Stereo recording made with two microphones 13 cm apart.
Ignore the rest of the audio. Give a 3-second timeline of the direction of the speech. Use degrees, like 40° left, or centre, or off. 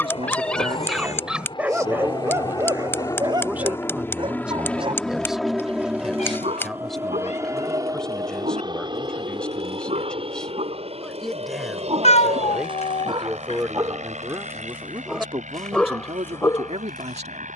30° right, 10° right, centre, 10° left, 20° right, 50° right.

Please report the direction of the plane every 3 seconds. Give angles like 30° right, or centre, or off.
40° left, 10° left, 20° right, 50° right, 60° right, 70° right.